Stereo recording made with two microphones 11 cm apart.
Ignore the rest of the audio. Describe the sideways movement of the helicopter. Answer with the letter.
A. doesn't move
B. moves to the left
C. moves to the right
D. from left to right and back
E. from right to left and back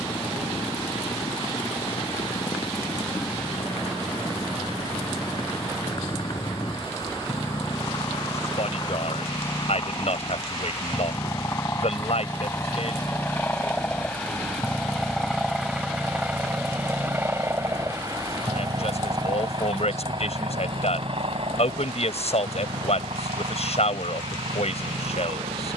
C.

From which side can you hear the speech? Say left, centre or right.
left.